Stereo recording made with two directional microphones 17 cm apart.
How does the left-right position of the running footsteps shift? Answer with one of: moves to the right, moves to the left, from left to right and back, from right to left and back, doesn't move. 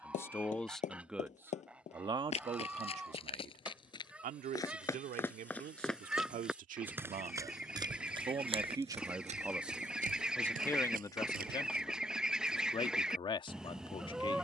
moves to the right.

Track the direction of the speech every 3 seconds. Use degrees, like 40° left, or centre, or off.
10° right, 60° right, 40° right, 10° left, 30° left.